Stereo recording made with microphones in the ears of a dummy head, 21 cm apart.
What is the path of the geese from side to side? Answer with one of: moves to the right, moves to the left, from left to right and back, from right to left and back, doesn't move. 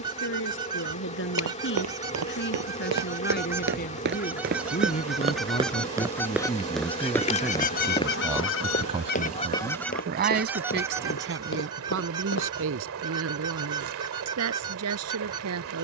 from right to left and back.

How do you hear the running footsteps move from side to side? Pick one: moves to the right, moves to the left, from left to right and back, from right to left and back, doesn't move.
moves to the left.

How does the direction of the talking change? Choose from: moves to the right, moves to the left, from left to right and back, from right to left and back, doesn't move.
moves to the right.